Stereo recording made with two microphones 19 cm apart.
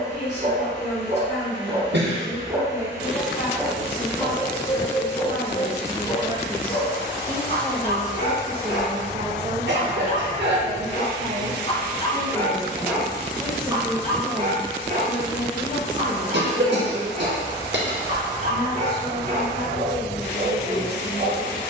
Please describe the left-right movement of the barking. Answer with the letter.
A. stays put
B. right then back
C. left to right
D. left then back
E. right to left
D.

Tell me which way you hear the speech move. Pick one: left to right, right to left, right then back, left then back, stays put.
right then back.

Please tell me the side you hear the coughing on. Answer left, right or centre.
right.